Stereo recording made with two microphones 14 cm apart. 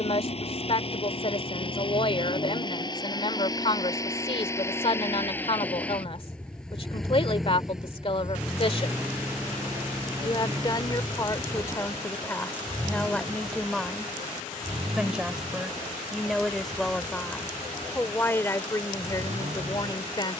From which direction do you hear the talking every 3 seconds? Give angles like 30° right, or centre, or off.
40° left, 40° left, 40° left, 30° left, 10° left, centre, 20° left.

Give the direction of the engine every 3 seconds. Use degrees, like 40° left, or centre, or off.
40° left, 20° left, centre, 20° right, 30° right, 40° right, 50° right.